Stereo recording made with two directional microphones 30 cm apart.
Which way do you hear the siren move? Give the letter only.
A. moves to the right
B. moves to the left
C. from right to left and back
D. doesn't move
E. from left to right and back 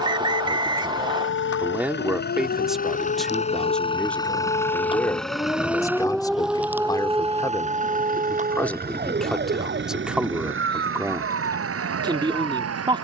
A.